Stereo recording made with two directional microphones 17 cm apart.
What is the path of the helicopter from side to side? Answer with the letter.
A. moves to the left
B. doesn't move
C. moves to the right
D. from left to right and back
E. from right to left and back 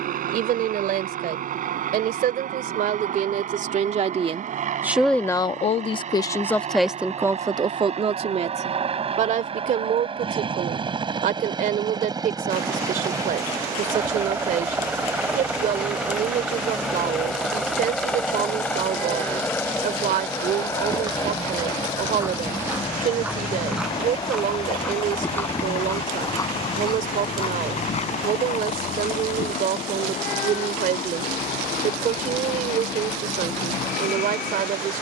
A.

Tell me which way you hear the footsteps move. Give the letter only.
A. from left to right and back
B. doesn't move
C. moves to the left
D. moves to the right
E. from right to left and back
C.